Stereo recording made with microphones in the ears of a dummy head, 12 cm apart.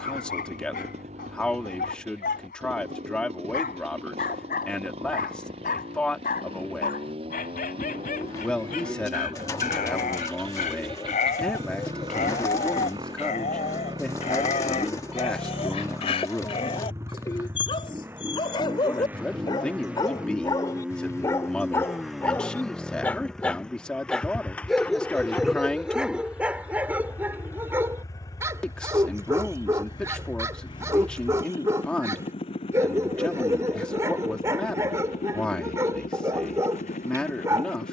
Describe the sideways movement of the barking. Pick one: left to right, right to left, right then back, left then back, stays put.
left to right.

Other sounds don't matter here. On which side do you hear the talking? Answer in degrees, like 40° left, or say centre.
10° left.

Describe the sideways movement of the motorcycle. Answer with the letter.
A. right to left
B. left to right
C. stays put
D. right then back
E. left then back
A.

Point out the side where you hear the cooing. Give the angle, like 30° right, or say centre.
20° left.